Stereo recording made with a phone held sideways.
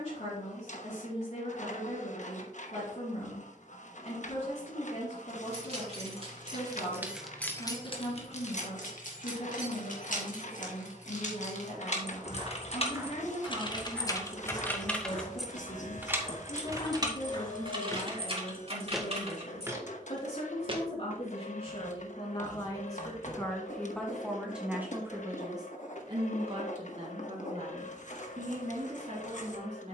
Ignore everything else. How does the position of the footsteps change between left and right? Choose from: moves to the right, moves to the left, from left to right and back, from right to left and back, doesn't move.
from right to left and back.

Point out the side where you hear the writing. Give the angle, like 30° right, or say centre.
60° left.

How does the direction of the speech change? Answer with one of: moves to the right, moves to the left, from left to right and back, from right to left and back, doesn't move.
moves to the right.